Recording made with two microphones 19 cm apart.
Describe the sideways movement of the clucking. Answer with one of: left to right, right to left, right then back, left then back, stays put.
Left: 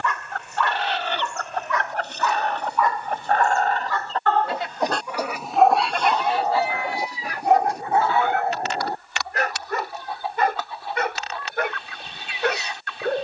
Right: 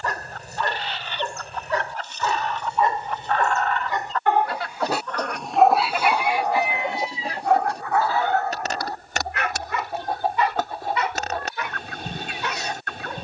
left to right.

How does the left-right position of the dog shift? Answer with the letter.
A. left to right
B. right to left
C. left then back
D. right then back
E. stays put
B.